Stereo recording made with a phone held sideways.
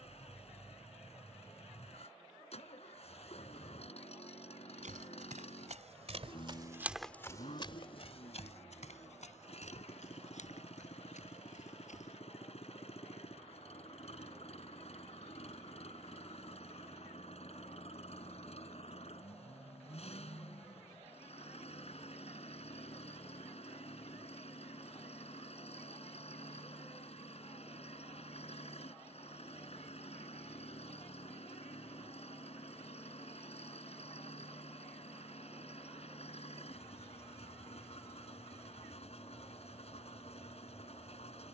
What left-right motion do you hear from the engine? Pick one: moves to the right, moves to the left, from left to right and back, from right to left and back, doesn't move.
doesn't move.